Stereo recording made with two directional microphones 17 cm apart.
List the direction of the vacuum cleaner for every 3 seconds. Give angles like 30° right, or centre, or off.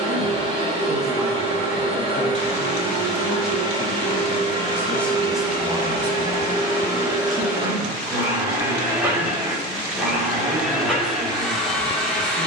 30° right, 30° right, 20° right, centre.